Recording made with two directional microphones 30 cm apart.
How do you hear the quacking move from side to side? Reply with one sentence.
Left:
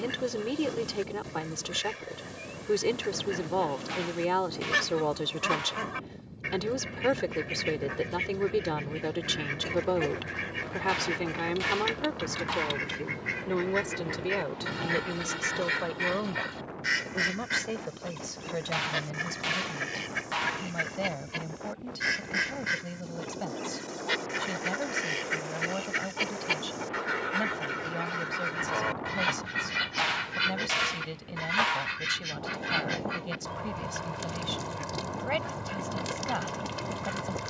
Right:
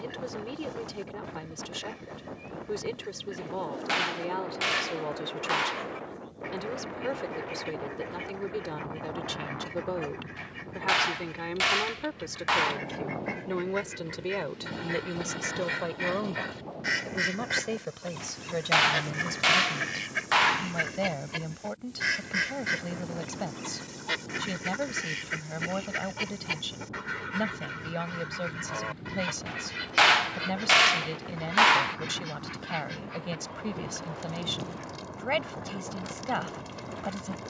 You can hear the quacking go right and come back.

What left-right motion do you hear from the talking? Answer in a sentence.
You can hear the talking move from left to right.